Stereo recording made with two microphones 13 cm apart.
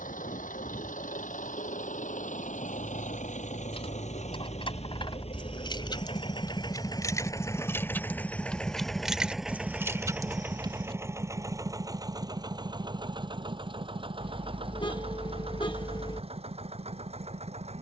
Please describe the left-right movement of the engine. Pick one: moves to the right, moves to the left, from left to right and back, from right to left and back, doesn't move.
moves to the right.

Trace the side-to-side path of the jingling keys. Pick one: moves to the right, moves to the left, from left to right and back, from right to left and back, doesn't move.
moves to the right.